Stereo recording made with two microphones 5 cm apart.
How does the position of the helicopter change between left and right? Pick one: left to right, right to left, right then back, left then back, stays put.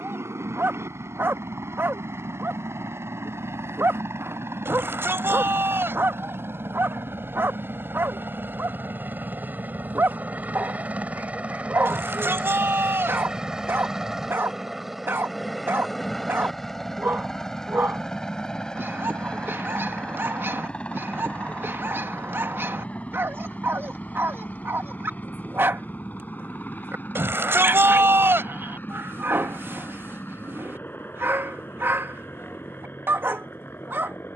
right to left.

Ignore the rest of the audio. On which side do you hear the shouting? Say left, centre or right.
right.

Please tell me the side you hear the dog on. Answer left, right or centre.
right.